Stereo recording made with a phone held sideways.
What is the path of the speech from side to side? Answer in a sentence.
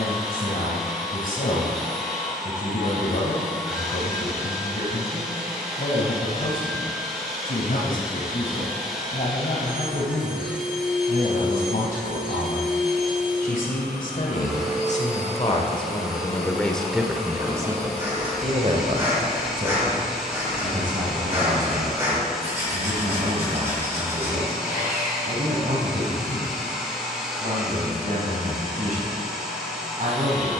In this clip you hear the speech travel towards the right.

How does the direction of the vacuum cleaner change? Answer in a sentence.
In this clip you hear the vacuum cleaner stay put.